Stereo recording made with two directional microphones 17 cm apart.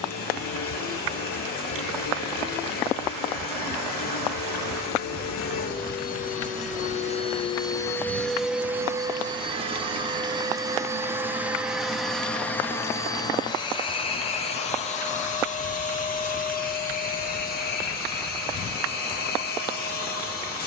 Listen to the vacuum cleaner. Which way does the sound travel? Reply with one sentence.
In this clip you hear the vacuum cleaner go right and come back.